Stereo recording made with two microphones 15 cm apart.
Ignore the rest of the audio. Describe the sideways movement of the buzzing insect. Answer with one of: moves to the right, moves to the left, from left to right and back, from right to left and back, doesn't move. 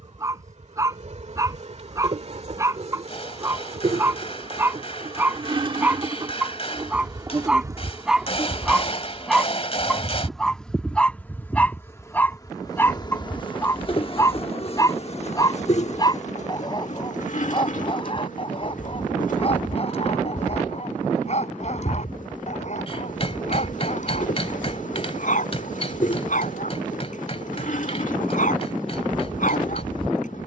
moves to the left.